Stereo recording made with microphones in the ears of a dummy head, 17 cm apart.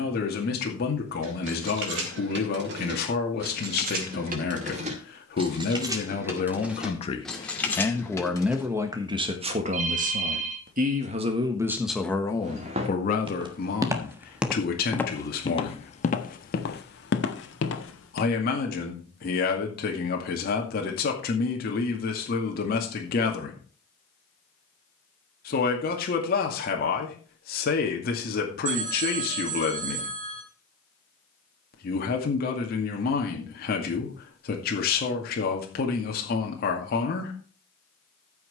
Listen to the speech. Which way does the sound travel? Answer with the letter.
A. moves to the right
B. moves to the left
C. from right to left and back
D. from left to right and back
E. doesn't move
D.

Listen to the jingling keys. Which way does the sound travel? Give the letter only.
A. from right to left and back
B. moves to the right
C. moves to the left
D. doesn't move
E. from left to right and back
C.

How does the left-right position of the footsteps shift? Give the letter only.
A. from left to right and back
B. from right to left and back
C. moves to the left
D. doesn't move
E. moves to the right
C.